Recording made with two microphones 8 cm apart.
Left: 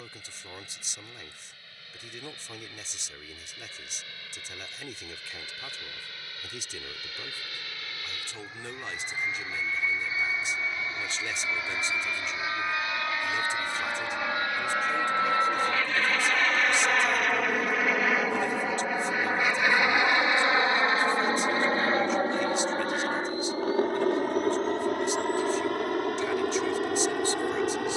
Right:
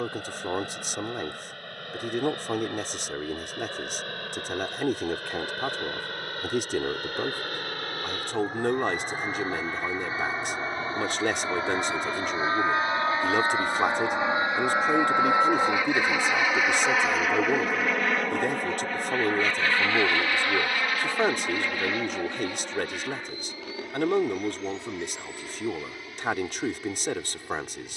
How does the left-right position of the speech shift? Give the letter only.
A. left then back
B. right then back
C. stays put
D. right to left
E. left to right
C.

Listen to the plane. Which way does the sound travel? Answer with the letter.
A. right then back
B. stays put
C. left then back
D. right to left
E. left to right
D.